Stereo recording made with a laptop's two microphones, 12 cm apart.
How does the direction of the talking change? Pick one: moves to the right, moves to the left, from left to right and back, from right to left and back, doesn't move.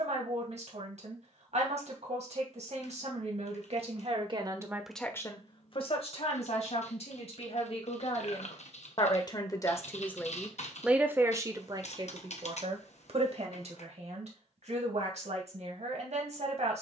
from right to left and back.